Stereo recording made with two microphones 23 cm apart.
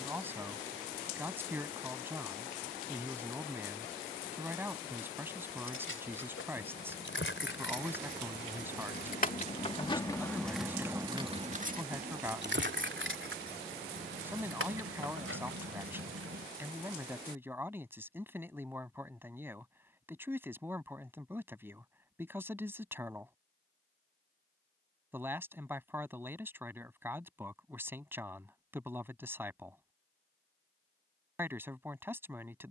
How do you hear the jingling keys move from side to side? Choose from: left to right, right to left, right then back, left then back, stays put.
left to right.